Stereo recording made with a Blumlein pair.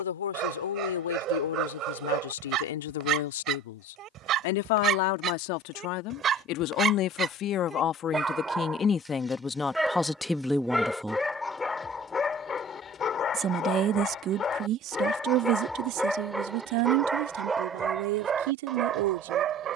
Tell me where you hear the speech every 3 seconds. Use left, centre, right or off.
left, left, left, centre, right, right, right.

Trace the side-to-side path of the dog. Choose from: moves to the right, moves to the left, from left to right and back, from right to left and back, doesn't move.
from right to left and back.